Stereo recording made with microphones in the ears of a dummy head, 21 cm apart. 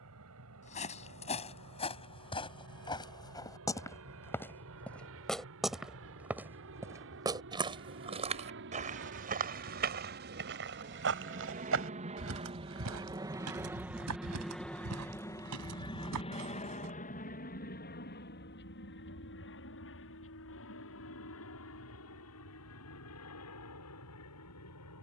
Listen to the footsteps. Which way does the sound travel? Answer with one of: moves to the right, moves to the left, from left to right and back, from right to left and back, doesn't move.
moves to the right.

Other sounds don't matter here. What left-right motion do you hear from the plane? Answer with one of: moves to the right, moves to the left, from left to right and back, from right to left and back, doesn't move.
moves to the left.